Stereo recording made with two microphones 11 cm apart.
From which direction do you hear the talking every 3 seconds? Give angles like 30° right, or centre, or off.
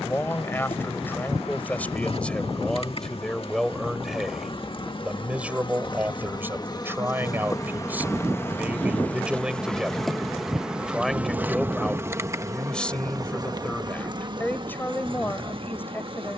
20° left, centre, 20° right, centre, 10° left, 20° left.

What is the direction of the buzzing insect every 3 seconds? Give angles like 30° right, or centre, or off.
60° left, 50° left, 30° left, centre, 40° right, 50° right.